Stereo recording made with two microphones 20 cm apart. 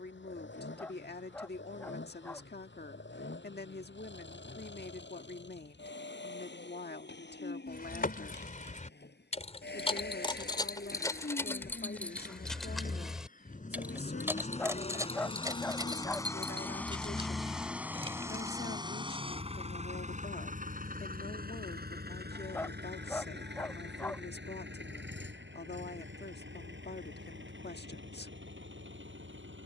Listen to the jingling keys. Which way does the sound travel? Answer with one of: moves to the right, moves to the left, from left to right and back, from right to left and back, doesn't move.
moves to the right.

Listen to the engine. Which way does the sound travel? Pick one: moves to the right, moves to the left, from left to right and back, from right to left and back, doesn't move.
moves to the right.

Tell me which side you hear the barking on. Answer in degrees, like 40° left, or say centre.
10° left.